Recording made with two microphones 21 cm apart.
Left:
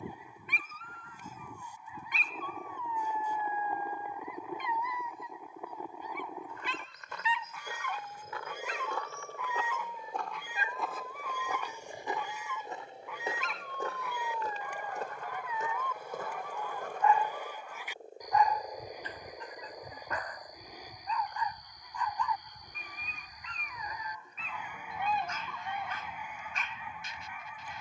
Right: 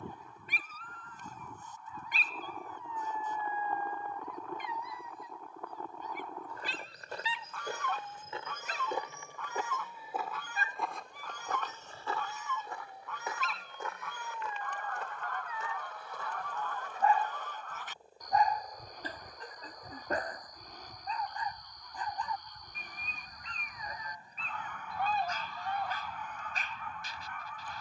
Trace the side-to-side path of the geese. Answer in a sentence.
You can hear the geese stay in one place.